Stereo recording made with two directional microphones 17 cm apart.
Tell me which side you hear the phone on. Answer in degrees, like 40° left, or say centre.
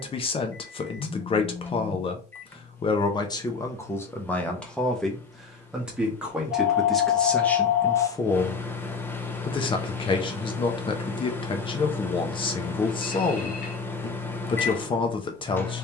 60° left.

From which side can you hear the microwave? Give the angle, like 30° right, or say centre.
10° left.